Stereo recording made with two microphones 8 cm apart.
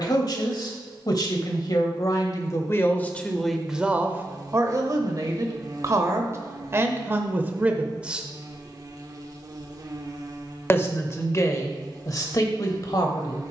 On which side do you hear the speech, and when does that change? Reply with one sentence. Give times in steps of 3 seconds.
You can hear the speech on the left from 0 s, on the right from 3 s and on the left from 9 s.